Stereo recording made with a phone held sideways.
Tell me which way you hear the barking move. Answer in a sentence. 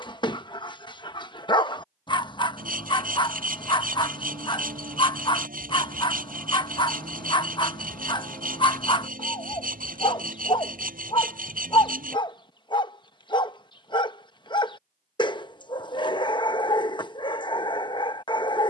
You can hear the barking stay in one place.